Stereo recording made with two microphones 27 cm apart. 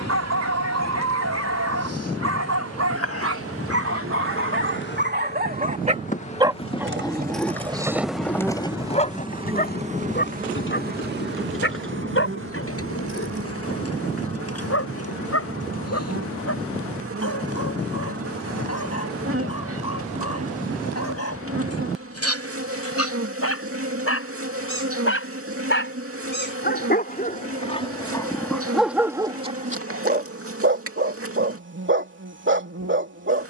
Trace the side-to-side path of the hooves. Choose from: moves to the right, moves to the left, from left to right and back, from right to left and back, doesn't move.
moves to the left.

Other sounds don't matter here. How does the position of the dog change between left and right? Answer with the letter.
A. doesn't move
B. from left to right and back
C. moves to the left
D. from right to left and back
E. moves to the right
D.